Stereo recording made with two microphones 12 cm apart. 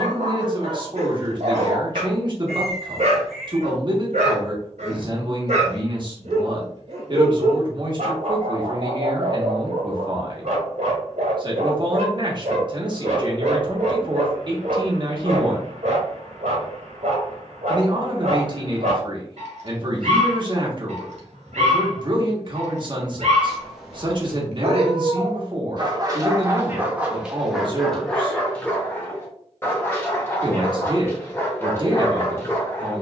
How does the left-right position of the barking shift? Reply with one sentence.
In this clip you hear the barking move from right to left.